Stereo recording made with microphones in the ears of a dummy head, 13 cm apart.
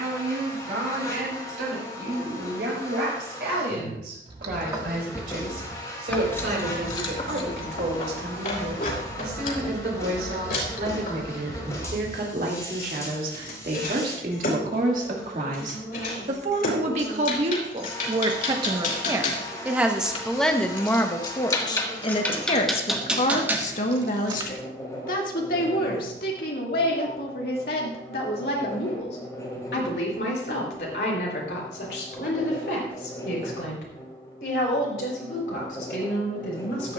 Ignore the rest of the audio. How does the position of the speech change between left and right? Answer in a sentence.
You can hear the speech move from right to left.